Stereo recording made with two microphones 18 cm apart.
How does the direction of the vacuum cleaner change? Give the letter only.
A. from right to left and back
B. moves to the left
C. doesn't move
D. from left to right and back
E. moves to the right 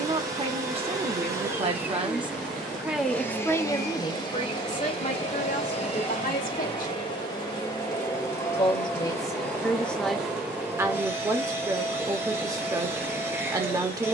A.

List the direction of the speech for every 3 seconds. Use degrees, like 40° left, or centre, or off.
30° right, 30° left, 40° left, centre, 20° right.